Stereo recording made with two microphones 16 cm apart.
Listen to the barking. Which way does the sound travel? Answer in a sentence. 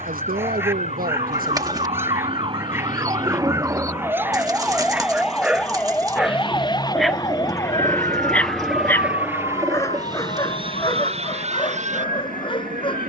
In this clip you hear the barking move from right to left.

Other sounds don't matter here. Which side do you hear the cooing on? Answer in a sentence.
You can hear the cooing on the right.